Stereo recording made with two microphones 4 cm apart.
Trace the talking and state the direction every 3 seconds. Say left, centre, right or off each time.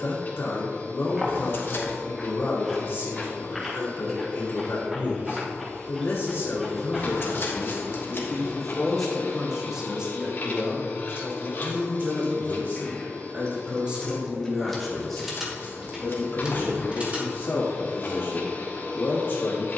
left, left, left, right, right, left, left.